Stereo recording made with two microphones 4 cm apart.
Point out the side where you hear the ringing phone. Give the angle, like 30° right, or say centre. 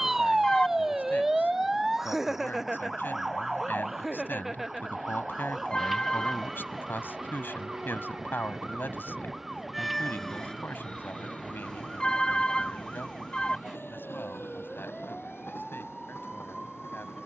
20° left.